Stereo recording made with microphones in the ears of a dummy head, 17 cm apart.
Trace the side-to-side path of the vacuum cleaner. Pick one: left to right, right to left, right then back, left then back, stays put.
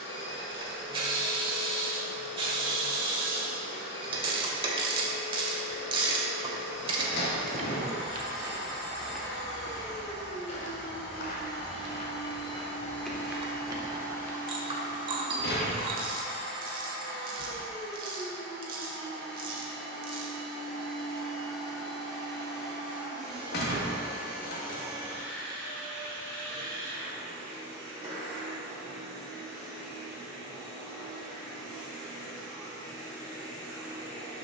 left to right.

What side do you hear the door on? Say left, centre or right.
left.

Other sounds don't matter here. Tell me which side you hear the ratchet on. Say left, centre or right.
right.